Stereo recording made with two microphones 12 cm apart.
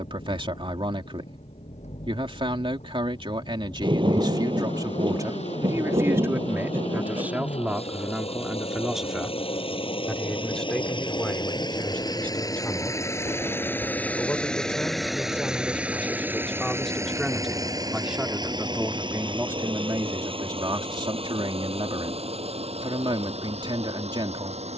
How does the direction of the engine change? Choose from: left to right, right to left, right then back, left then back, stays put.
left to right.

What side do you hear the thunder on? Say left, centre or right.
right.